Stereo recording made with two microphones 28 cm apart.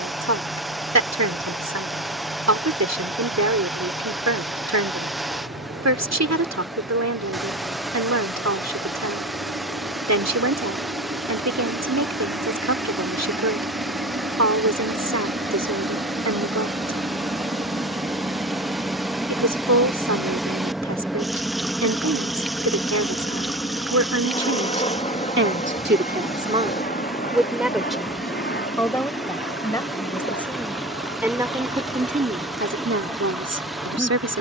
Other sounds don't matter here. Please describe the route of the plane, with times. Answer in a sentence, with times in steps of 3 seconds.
You can hear the plane on the right from 0 s, in the centre from 18 s and on the left from 24 s.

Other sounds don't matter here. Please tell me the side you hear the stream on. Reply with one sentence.
You can hear the stream in the centre.